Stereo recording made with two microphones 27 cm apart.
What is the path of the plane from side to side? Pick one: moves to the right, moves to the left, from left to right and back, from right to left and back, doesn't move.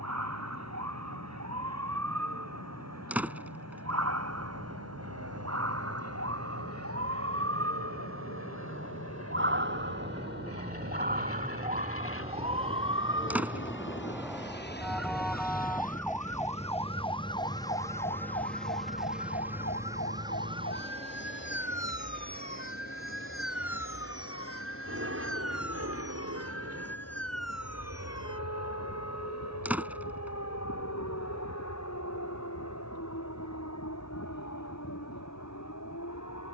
moves to the right.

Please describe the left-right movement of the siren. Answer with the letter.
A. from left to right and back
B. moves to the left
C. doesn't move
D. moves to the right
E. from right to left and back
B.